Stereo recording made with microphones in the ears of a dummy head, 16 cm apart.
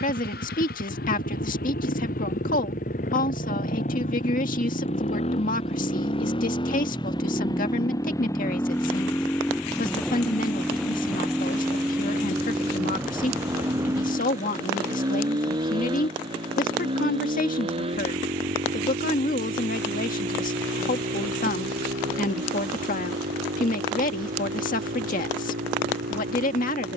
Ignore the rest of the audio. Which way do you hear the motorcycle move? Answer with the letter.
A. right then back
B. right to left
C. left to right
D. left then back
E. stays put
C.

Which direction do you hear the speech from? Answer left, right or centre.
left.